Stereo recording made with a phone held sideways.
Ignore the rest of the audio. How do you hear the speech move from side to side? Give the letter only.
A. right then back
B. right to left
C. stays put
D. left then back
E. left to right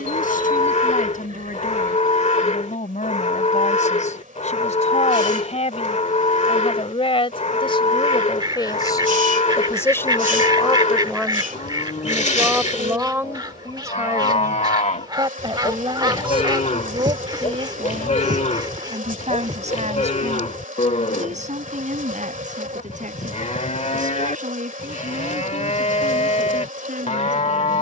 E.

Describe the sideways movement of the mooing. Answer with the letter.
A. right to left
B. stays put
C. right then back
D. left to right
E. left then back
B.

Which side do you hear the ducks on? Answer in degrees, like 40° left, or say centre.
30° right.